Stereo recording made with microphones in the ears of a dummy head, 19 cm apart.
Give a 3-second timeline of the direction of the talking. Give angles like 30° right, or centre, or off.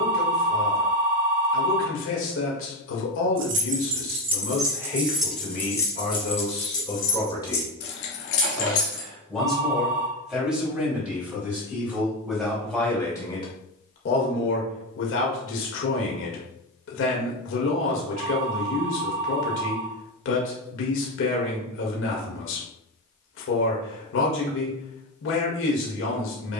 60° left, 60° left, 20° left, centre, 30° left, 60° left, 60° left, 60° left, 60° left.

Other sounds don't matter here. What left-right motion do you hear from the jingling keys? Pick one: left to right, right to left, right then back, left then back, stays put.
right to left.